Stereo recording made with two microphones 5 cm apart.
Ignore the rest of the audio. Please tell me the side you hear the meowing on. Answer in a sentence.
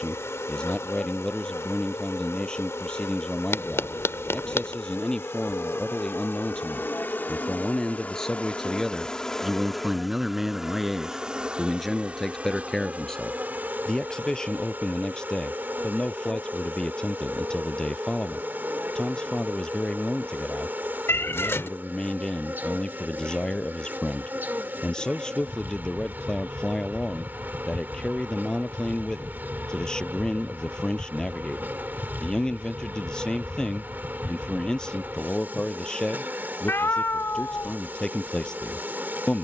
You can hear the meowing on the left.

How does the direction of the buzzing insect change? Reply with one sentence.
In this clip you hear the buzzing insect travel towards the right.